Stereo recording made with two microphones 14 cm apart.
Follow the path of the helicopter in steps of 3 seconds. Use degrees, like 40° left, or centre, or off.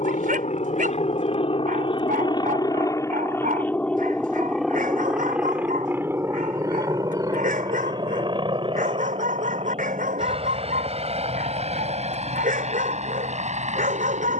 40° left, centre, 30° right, 40° right, 50° right.